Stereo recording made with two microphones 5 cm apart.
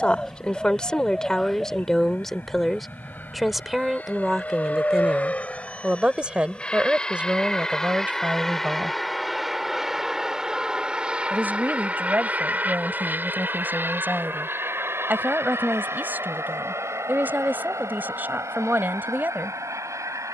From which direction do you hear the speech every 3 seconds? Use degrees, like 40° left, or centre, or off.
10° left, 10° right, 30° right, 40° right, 40° right, 40° right, 40° right.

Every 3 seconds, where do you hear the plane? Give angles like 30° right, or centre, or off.
50° left, 30° left, 10° left, 10° right, 40° right, 60° right, 70° right.